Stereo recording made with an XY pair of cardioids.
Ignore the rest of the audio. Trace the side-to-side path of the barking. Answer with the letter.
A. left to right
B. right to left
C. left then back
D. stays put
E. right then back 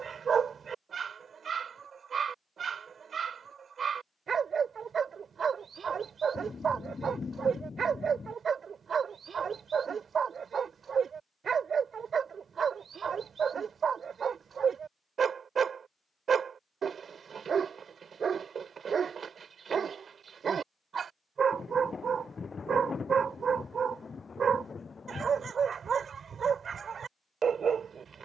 D.